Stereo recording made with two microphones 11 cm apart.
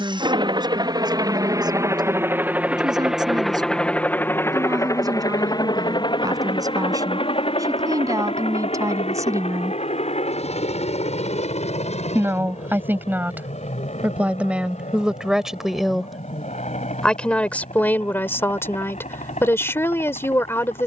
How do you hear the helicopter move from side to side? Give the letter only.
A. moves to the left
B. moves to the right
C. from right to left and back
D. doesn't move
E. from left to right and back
A.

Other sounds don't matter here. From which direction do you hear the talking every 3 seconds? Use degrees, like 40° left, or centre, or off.
40° right, 40° right, 30° right, 30° right, 20° right, centre, 20° left.